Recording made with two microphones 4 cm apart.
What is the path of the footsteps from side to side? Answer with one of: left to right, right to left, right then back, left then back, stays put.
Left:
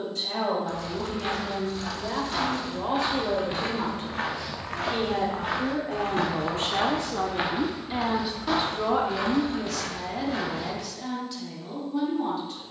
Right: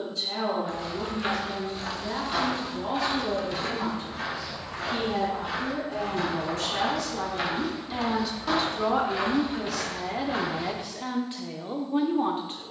left then back.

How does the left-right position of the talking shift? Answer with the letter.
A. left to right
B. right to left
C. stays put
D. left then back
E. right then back
A.